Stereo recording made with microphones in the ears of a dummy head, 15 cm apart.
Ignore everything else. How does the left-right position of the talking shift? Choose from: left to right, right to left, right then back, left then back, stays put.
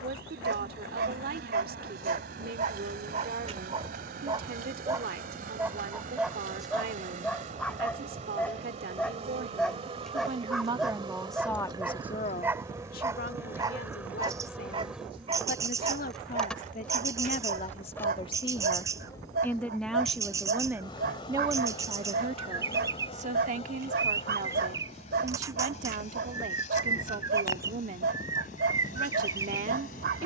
left then back.